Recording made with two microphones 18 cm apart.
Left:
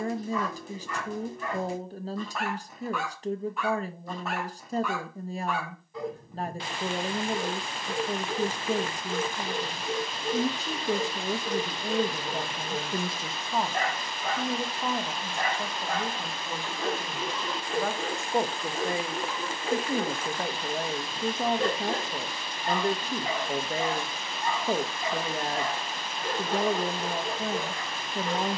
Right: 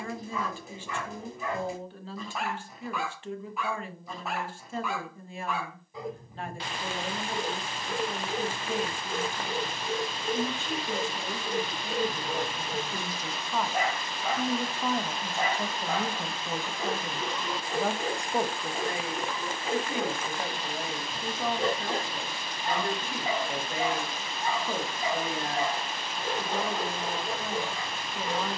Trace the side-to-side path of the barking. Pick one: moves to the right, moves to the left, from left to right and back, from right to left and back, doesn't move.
doesn't move.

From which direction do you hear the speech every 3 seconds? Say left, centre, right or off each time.
left, left, left, left, left, centre, left, left, left, left.